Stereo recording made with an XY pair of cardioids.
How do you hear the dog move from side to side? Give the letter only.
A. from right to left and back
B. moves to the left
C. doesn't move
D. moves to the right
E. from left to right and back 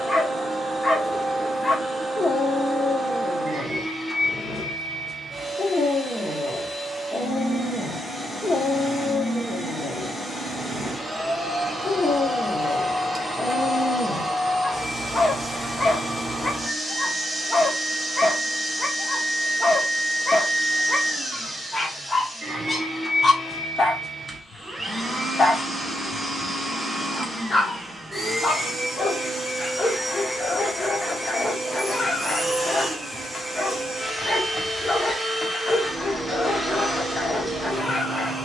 C.